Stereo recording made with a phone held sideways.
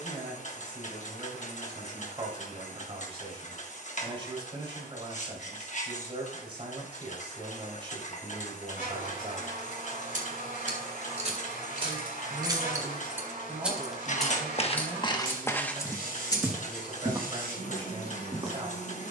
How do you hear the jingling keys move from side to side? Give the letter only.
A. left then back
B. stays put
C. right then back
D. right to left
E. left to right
D.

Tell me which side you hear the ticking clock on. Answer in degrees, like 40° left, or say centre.
50° left.